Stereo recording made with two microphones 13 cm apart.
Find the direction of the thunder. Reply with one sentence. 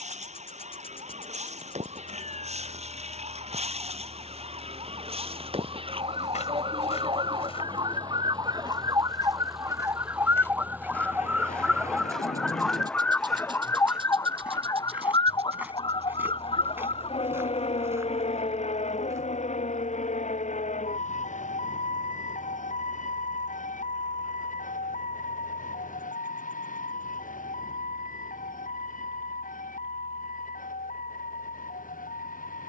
You can hear the thunder on the left.